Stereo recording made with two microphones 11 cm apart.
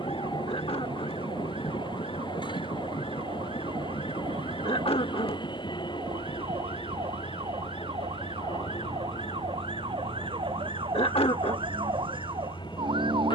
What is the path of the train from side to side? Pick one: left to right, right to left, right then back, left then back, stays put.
stays put.